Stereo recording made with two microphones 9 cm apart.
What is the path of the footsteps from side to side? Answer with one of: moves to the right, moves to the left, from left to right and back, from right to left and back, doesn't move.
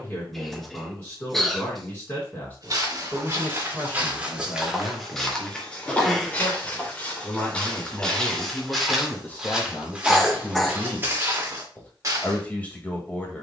from right to left and back.